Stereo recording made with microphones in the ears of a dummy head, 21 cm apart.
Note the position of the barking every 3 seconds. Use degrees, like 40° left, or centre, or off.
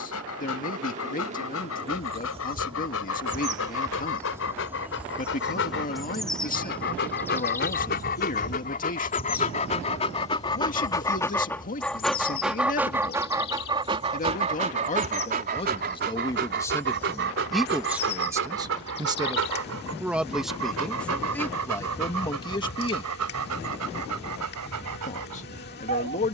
60° left, 60° left, 40° left, 20° left, 20° right, 50° right, 60° right, 70° right, 80° right.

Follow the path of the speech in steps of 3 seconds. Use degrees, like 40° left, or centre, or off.
40° left, 40° left, 40° left, 40° left, 40° left, 10° left, 10° right, 20° left, 30° left.